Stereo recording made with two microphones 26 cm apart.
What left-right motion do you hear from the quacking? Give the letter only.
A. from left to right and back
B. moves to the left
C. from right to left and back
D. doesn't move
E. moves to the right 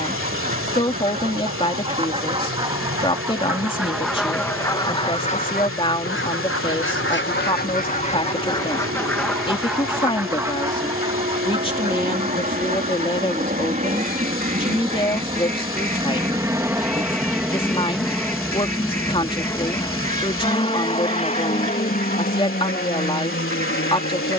C.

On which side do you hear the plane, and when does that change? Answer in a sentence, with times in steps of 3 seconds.
In this clip you hear the plane on the right from 0 s, in the centre from 15 s and on the left from 21 s.